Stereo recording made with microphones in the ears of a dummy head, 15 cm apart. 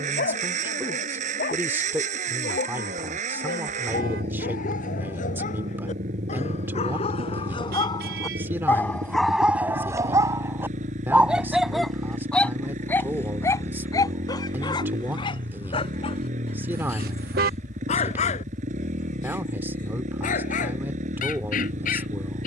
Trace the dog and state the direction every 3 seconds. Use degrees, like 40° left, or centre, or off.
60° left, 50° left, 30° left, 10° right, 20° left, 40° left, 50° left, 50° left.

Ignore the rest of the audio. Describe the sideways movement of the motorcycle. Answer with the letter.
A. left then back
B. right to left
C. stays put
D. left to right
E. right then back
C.